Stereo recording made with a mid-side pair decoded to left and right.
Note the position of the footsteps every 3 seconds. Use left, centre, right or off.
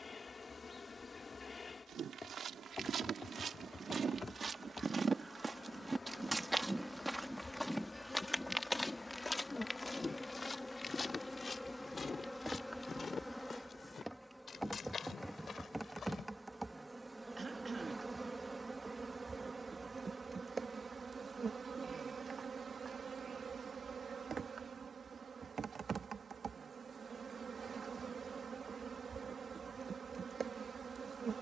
right, right, centre, left, left, left, off, off, off, off, off.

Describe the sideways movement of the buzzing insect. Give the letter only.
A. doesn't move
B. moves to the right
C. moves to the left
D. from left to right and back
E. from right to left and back
B.